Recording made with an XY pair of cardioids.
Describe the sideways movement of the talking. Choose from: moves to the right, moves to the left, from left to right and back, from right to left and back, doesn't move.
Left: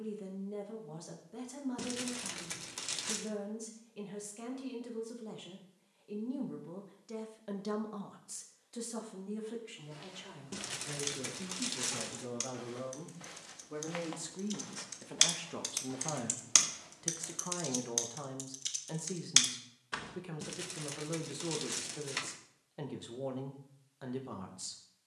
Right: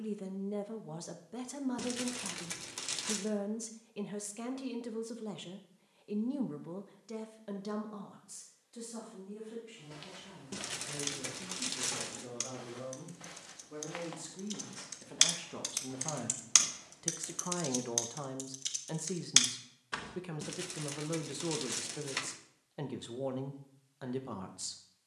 from right to left and back.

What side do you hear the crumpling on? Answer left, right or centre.
centre.